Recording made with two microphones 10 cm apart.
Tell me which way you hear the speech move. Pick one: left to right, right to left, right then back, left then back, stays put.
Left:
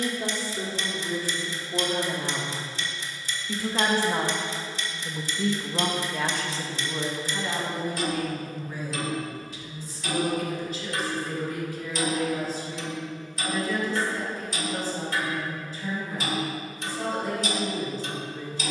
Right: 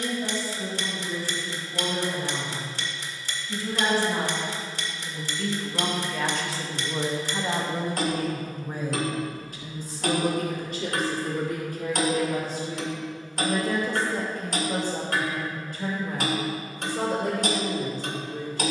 left to right.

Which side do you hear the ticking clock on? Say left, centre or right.
right.